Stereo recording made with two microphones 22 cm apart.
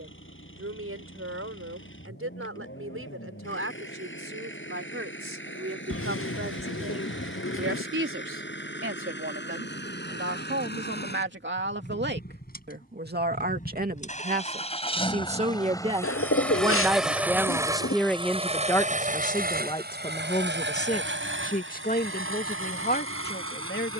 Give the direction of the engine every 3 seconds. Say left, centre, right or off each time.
left, left, left, left, left, centre, right, right.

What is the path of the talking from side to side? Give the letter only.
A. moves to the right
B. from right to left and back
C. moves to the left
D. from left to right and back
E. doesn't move
C.